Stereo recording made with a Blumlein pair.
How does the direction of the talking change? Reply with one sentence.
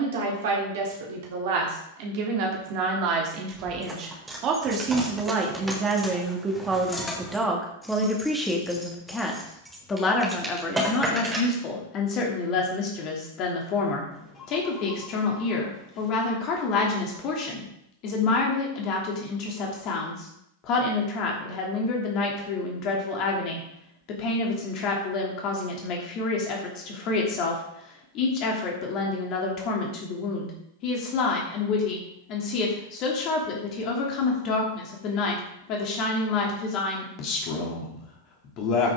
You can hear the talking move to the left.